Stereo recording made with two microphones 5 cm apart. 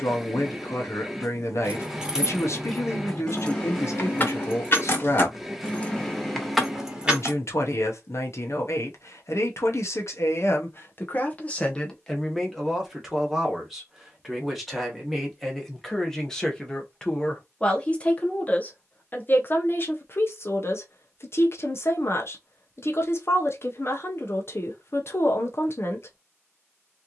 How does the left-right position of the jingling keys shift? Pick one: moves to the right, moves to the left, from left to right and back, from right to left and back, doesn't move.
from right to left and back.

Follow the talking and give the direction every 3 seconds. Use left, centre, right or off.
left, left, left, left, centre, centre, left, left, left.